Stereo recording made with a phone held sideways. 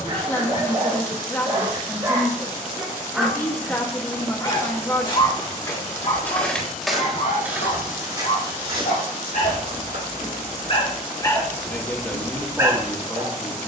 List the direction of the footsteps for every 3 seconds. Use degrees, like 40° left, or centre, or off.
off, 30° left, 10° right, 50° right, off.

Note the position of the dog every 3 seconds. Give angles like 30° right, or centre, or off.
30° right, 30° left, 70° left, 40° left, 20° right.